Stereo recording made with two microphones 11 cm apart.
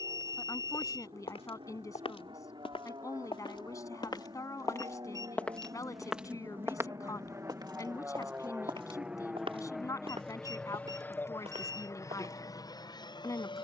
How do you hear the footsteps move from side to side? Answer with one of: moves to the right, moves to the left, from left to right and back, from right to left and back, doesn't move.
moves to the right.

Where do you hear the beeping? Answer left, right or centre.
right.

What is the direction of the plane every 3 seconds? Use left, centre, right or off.
right, right, right, centre, left.